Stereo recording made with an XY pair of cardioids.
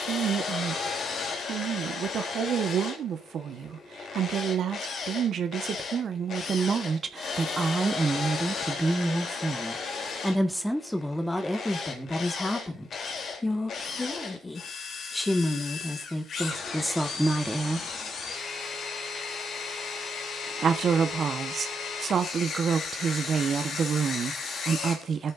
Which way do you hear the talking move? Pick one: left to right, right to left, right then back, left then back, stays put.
left then back.